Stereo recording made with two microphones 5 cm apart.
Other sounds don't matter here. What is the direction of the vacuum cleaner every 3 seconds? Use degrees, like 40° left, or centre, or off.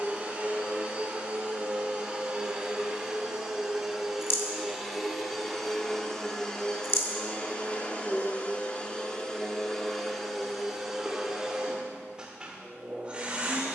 20° right, centre, 20° left, centre, 20° right.